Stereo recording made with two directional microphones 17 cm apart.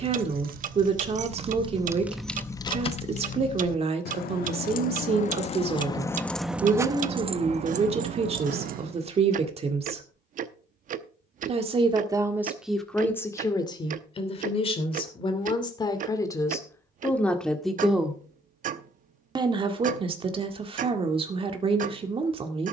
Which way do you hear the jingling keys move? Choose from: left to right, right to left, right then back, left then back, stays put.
left then back.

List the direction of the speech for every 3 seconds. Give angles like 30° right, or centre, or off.
40° right, 40° right, 40° right, 40° right, 20° left, 20° left, 30° right, 30° right.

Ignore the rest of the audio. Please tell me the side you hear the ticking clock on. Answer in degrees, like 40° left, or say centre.
50° right.